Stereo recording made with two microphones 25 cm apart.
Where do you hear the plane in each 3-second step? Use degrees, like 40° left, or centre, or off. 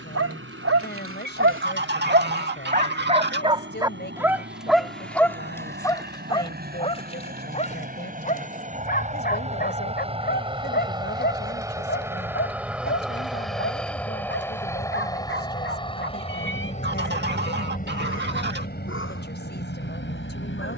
60° right, 50° right, 40° right, 20° right, centre, 20° left, 40° left.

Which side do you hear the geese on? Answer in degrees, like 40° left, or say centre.
40° right.